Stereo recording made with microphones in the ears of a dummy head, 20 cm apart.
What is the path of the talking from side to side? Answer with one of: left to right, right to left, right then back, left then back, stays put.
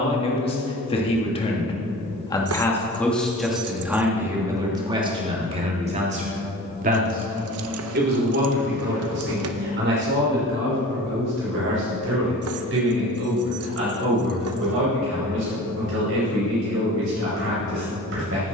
left to right.